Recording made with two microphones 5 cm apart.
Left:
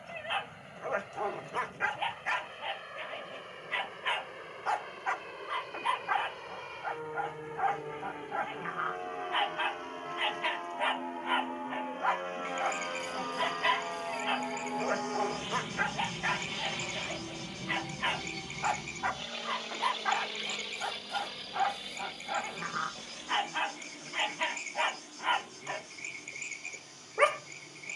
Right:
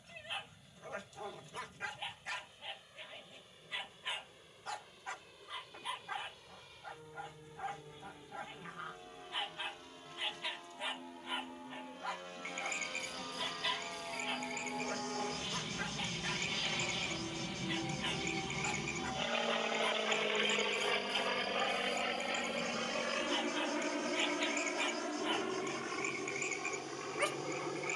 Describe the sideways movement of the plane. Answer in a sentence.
In this clip you hear the plane move to the right.